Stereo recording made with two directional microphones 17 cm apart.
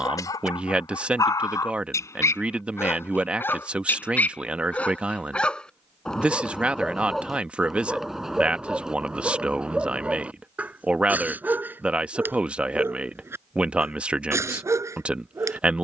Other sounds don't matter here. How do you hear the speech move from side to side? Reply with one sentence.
In this clip you hear the speech stay in one place.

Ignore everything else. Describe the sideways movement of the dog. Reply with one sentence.
In this clip you hear the dog go from the left side to the right.